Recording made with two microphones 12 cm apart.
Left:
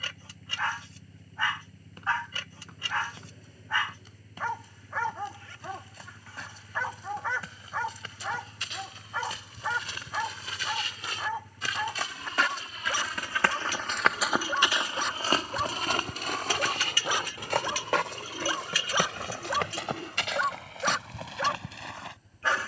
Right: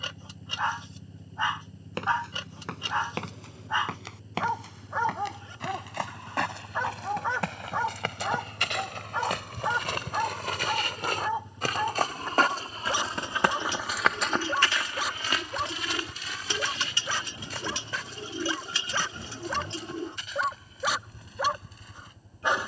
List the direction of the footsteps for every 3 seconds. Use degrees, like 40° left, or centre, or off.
80° right, 70° right, 70° right, 60° right, 10° right, 50° left, 70° left, 80° left.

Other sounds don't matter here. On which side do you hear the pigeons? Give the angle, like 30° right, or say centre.
30° right.